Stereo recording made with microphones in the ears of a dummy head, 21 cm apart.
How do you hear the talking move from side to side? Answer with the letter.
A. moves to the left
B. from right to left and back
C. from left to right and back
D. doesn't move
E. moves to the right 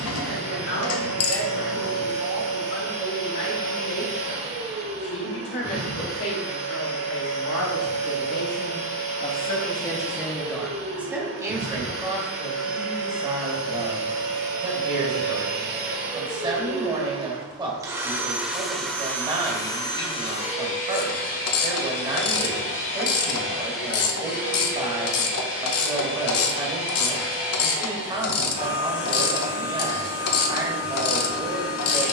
E.